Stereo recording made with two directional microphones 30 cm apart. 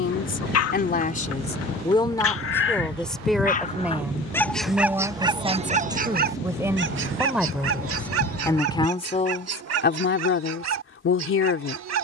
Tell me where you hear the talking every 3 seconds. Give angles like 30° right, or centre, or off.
20° left, 10° right, centre, 40° left.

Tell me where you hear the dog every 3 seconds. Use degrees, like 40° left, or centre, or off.
50° left, centre, 50° right, 60° right.